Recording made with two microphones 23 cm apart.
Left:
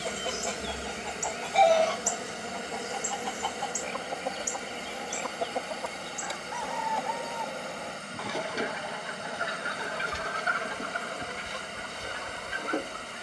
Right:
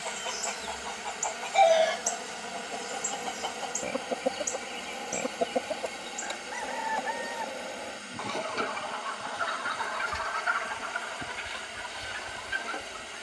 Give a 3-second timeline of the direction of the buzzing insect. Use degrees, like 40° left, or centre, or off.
30° left, 10° left, centre, 10° right, 10° right.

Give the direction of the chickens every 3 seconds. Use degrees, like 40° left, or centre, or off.
10° left, 40° right, 10° right, 40° left, 60° left.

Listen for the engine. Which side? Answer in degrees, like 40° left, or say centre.
60° left.